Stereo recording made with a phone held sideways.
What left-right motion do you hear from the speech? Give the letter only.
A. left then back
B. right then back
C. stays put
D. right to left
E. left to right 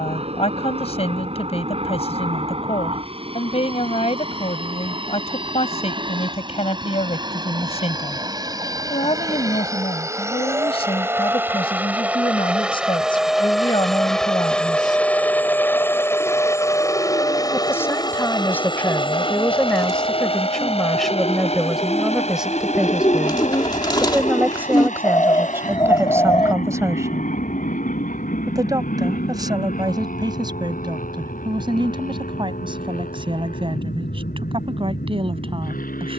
E.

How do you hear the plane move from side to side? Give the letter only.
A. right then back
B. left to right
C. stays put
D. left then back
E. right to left
E.